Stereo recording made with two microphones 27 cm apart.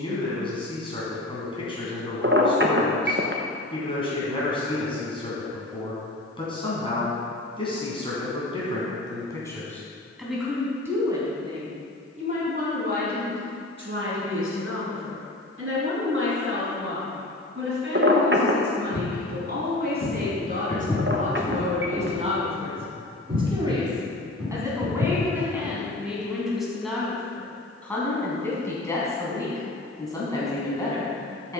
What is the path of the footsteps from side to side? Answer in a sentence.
You can hear the footsteps go from the left side to the right.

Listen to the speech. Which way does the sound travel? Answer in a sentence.
You can hear the speech move from left to right and back again.